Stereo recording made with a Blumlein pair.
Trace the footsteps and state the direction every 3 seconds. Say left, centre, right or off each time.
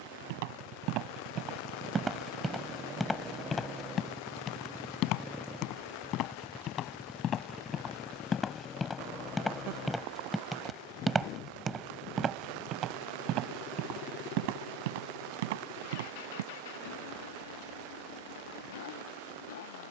right, left, left, centre, right, right, off.